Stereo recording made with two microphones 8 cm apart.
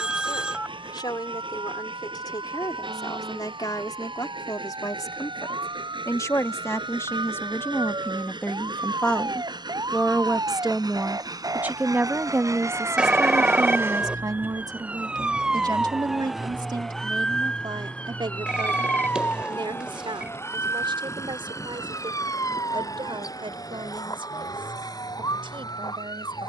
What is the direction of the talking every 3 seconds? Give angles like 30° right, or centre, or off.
60° left, 50° left, 30° left, 10° right, 40° right, 60° right, 70° right, 80° right, 80° right.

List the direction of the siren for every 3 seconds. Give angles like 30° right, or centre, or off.
80° right, 70° right, 60° right, 50° right, 30° right, centre, 30° left, 40° left, 50° left.